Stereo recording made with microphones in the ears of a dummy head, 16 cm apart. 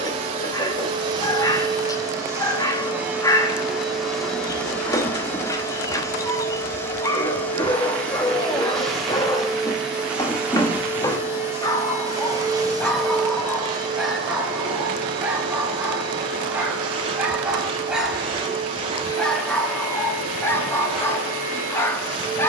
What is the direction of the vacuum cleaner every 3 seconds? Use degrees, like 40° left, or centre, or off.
20° right, centre, 10° left, 10° right, 30° right, 30° right, 30° right, 30° right.